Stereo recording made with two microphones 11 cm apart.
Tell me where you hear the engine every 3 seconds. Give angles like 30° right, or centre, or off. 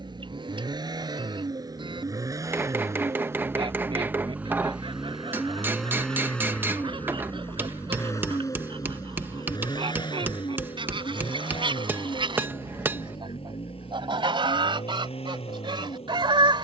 40° right, 10° right, 20° left, 50° left, 60° left, 70° left.